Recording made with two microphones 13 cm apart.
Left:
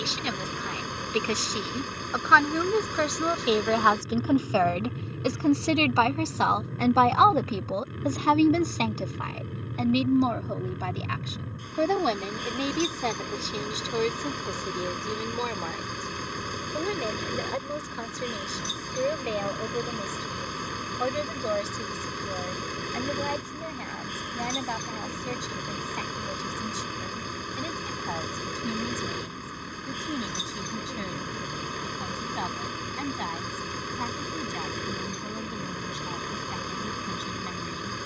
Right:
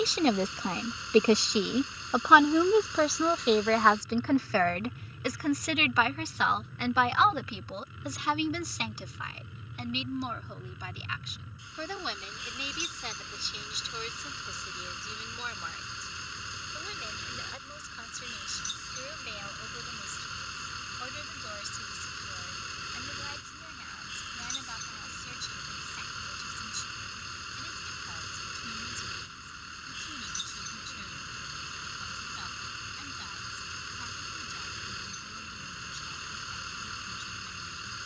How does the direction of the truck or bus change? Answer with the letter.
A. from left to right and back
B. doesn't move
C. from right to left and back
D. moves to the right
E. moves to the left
B.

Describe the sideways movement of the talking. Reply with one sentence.
You can hear the talking move to the left.